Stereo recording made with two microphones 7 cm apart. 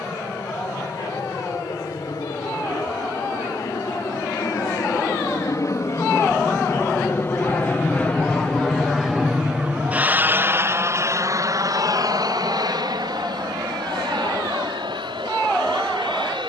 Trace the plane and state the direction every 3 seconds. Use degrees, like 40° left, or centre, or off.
70° left, 60° left, 30° left, 30° right, 60° right, 70° right.